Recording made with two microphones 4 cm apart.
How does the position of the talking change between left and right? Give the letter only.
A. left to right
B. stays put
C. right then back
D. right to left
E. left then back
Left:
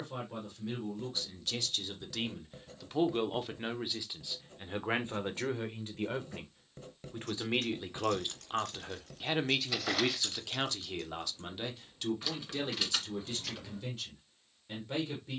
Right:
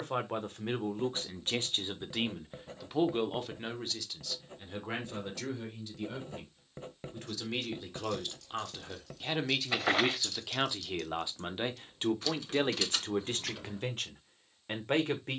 E.